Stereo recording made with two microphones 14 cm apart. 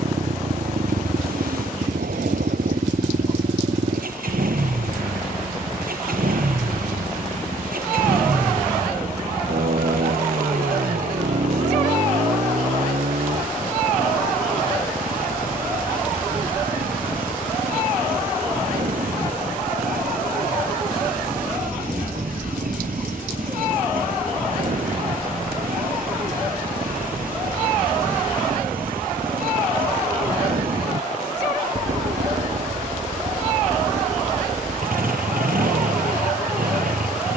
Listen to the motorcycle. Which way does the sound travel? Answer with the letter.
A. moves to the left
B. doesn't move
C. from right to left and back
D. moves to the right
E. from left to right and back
B.